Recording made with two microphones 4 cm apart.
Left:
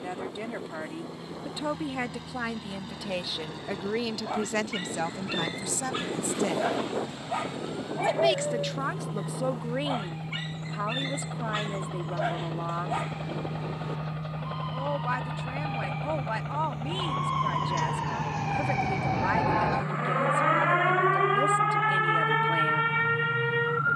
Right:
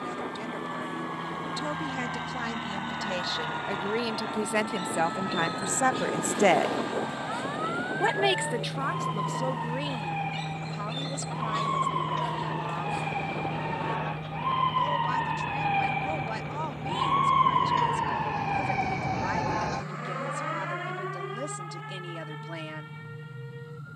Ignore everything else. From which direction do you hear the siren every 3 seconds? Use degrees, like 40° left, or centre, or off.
70° right, 60° right, 60° right, 60° right, 50° right, 30° right, 10° left, 60° left.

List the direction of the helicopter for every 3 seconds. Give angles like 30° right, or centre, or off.
50° right, 40° right, 30° right, 10° right, 10° left, 20° left, 40° left, 50° left.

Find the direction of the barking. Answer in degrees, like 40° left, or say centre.
40° left.